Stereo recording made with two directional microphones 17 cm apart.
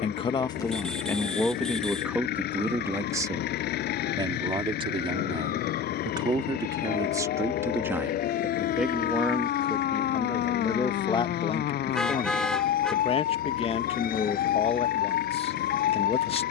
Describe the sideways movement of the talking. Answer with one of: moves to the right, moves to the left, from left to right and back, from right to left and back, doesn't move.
from left to right and back.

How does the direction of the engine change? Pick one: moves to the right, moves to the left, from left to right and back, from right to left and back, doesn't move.
doesn't move.